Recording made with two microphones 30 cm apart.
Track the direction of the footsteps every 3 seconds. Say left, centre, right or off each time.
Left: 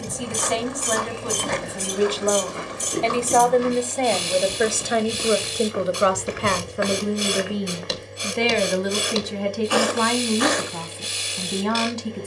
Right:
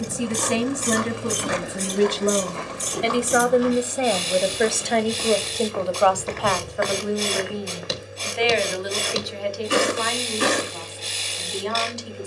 centre, left, centre, right.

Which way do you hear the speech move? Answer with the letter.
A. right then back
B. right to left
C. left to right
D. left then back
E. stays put
B.